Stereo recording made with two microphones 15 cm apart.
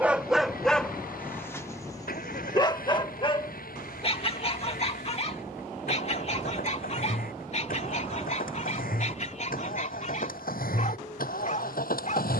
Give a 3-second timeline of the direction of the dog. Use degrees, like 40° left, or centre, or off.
10° left, 40° left, 50° left, 50° left.